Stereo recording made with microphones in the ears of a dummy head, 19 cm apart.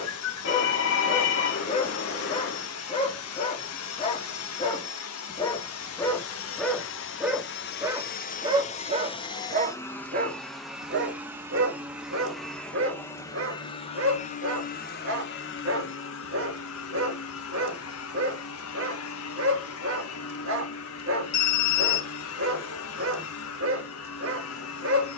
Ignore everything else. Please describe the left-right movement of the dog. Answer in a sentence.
In this clip you hear the dog travel towards the right.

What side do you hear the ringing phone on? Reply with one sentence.
You can hear the ringing phone on the left.